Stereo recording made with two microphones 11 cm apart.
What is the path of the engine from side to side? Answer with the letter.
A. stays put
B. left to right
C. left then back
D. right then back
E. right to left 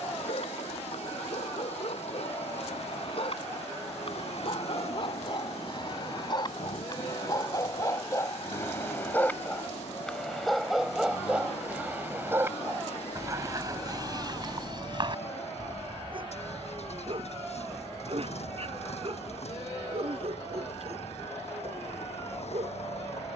A.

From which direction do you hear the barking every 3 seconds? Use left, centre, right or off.
left, left, left, centre, right, right, right, right.